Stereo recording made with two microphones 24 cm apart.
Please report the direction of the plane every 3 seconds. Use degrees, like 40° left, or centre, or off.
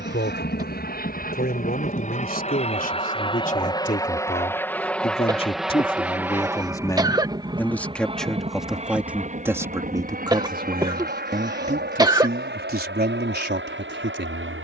40° left, 10° left, 20° right, 30° right, 40° right.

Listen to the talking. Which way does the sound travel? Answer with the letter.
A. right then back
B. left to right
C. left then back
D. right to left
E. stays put
B.